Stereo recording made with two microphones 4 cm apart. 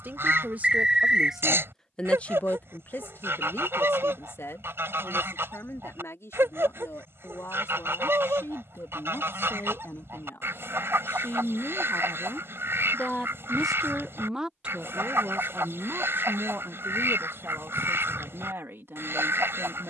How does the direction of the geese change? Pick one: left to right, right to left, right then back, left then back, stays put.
stays put.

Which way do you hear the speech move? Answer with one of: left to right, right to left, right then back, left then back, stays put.
left then back.